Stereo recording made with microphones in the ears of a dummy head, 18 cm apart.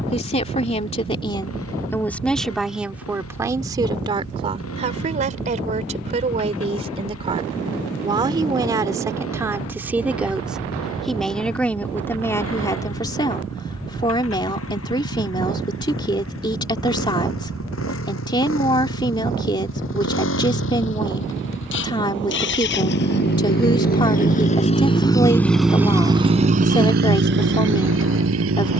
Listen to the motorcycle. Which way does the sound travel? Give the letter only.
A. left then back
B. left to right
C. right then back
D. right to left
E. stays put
B.